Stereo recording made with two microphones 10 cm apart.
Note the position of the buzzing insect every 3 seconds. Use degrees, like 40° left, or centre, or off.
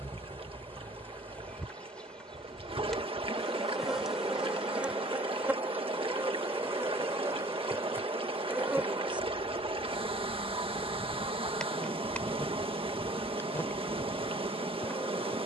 10° left, 10° right, 20° right, centre, 20° left.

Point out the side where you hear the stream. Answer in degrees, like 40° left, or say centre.
70° right.